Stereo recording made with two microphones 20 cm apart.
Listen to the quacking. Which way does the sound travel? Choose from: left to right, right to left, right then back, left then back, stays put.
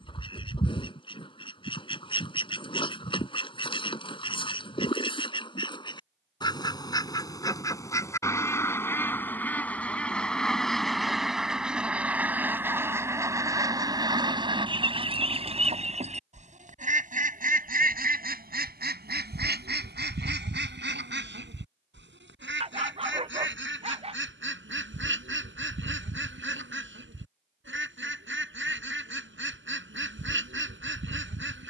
left to right.